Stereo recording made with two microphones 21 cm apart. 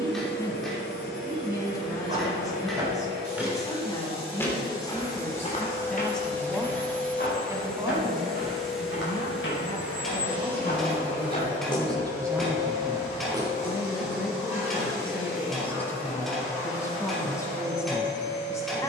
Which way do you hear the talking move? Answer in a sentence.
You can hear the talking go right and come back.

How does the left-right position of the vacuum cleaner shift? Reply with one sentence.
You can hear the vacuum cleaner travel towards the right.